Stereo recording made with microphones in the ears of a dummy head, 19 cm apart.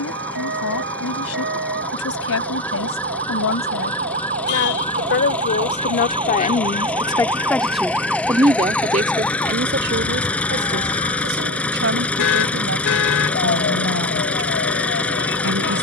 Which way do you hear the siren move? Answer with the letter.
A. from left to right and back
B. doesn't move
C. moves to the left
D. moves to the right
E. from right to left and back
C.